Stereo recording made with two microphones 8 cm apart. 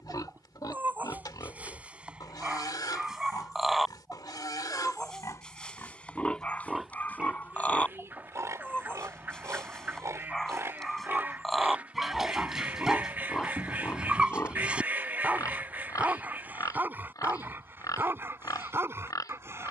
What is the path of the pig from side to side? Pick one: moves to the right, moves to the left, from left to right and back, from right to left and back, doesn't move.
from left to right and back.